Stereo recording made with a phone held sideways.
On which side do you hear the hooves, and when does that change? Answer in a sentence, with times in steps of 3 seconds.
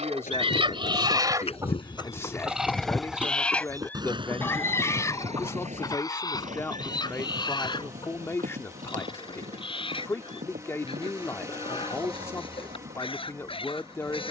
In this clip you hear the hooves on the left from 0 s and on the right from 3 s.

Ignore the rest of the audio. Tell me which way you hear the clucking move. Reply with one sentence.
You can hear the clucking move to the left.